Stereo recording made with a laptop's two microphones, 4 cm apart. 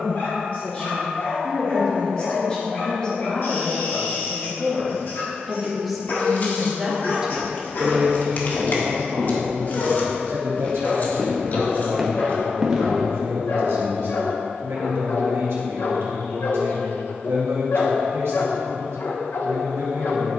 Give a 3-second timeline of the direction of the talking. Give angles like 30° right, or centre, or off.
30° left, 10° left, 20° right, 60° right, 70° right, 70° right, 70° right.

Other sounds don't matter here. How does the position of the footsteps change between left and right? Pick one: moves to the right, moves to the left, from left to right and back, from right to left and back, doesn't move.
moves to the right.